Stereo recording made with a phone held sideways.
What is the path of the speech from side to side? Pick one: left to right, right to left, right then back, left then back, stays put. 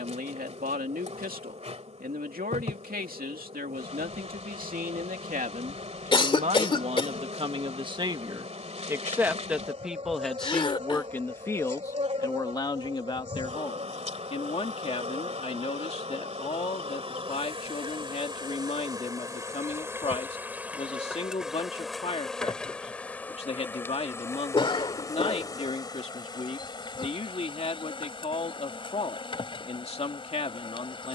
right to left.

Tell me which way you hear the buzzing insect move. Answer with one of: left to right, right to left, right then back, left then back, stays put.
right to left.